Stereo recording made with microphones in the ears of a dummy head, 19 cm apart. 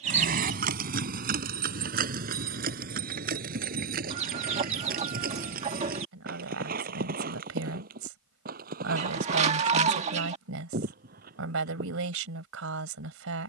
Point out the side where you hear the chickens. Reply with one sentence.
In this clip you hear the chickens on the right.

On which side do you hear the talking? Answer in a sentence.
In this clip you hear the talking on the right.